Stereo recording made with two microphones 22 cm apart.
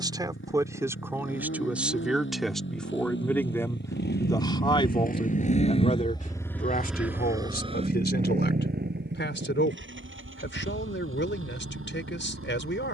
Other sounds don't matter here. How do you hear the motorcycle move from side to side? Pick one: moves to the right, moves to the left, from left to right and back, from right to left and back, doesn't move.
moves to the right.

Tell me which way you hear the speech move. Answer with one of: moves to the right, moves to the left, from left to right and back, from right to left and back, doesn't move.
moves to the left.